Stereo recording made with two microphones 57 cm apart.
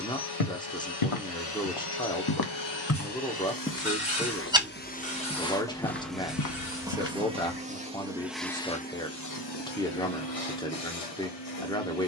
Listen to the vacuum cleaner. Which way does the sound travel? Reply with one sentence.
In this clip you hear the vacuum cleaner move from left to right and back again.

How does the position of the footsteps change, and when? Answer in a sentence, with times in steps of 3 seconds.
You can hear the footsteps on the left from 0 s, in the centre from 3 s, on the left from 6 s and not at all from 9 s.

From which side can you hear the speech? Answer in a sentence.
You can hear the speech in the centre.